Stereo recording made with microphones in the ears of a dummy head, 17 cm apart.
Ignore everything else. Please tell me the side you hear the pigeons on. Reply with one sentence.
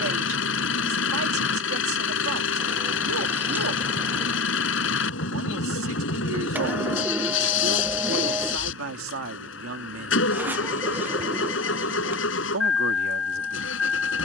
You can hear the pigeons in the centre.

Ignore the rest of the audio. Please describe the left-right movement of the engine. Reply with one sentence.
In this clip you hear the engine stay in one place.